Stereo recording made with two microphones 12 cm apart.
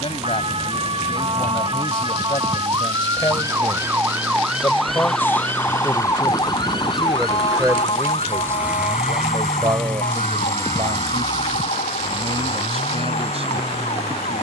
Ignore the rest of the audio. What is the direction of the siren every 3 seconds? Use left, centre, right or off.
right, centre, left, left, left.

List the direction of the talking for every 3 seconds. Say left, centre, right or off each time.
left, left, centre, right, right.